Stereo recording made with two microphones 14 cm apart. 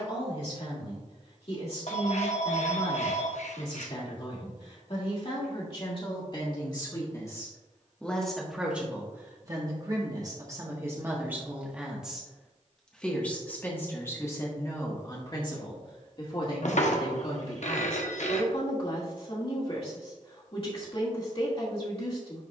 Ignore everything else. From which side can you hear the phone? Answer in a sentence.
You can hear the phone on the left.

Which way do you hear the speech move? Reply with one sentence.
You can hear the speech go right and come back.